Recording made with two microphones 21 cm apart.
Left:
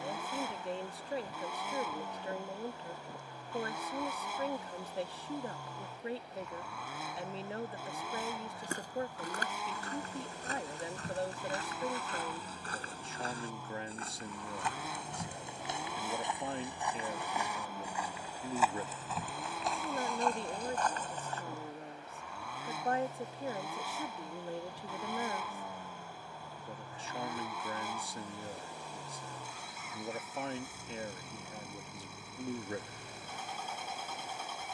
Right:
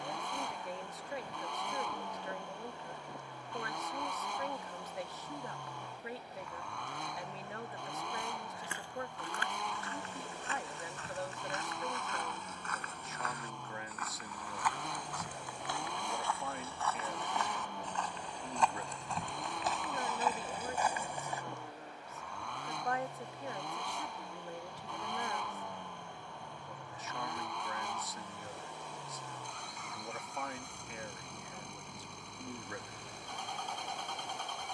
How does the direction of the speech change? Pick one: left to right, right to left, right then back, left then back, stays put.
stays put.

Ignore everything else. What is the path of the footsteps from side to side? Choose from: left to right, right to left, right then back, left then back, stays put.
left to right.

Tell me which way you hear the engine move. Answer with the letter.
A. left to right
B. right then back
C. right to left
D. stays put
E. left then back
D.